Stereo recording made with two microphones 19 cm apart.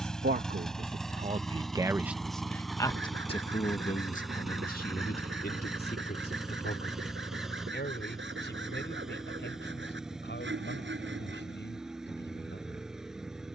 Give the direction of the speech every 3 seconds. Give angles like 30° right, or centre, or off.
30° right, 40° left, 60° left, 70° left, 70° left.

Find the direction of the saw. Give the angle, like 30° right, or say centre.
80° right.